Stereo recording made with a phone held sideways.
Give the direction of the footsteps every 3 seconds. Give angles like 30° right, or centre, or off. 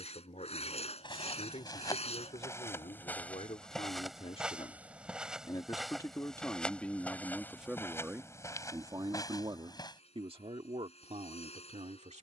30° left, centre, 10° left, 30° left.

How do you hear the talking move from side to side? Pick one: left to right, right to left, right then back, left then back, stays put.
left to right.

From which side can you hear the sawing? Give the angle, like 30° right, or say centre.
50° left.